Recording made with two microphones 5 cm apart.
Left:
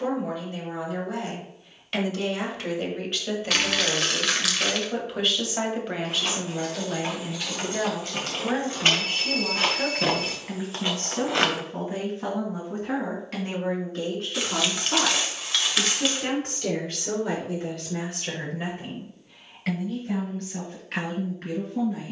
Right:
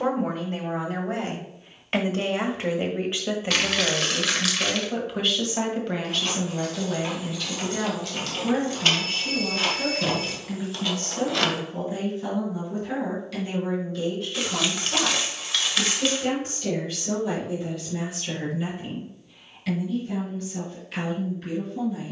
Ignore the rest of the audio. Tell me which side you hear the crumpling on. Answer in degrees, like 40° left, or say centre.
centre.